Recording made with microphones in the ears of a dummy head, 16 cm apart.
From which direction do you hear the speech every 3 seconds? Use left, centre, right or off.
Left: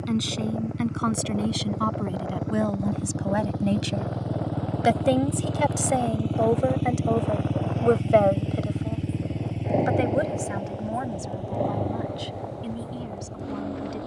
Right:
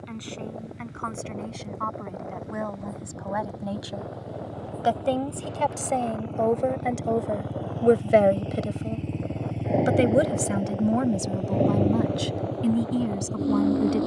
left, left, centre, right, right.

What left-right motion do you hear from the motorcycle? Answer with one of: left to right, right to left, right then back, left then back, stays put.
left to right.